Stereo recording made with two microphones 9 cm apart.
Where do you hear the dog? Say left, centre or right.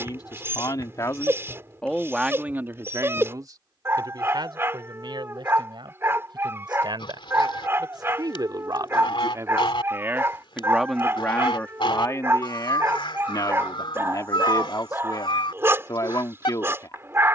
right.